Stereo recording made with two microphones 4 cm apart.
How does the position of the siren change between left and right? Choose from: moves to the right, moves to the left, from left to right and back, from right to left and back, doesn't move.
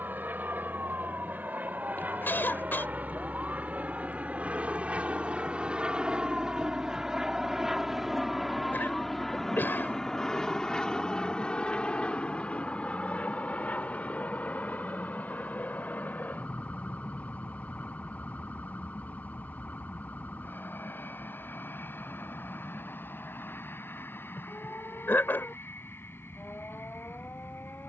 moves to the left.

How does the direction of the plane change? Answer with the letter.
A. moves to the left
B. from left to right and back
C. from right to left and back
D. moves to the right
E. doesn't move
A.